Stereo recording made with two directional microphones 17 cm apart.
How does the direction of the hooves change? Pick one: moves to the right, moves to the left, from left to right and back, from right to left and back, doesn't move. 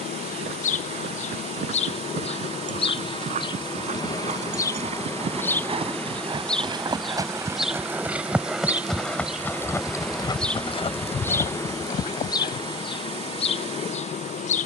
moves to the left.